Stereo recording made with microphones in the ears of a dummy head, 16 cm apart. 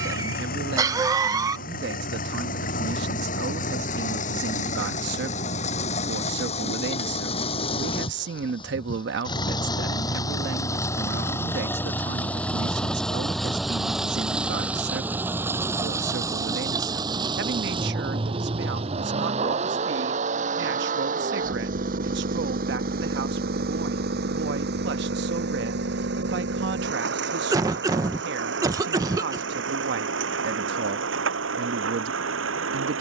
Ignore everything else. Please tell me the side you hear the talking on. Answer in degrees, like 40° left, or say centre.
60° right.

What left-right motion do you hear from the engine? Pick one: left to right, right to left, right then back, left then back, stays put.
left to right.